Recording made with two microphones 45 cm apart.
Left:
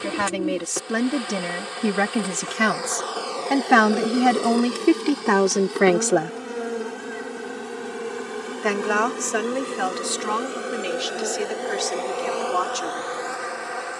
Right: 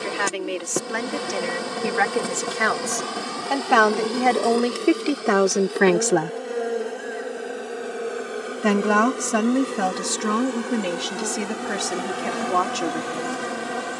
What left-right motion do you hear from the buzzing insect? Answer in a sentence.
You can hear the buzzing insect go left and come back.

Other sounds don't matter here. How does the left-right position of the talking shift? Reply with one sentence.
In this clip you hear the talking travel towards the right.